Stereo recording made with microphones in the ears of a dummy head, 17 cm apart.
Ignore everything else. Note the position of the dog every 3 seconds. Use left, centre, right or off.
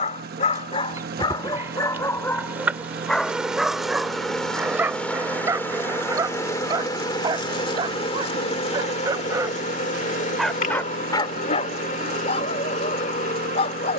left, centre, right, centre, left.